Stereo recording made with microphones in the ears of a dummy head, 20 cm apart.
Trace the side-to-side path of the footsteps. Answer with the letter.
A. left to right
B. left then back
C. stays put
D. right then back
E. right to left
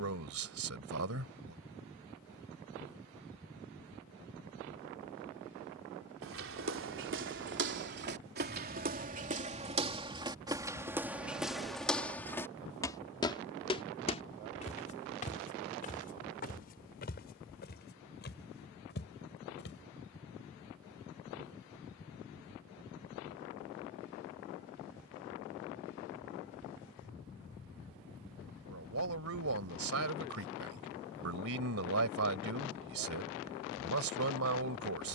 E.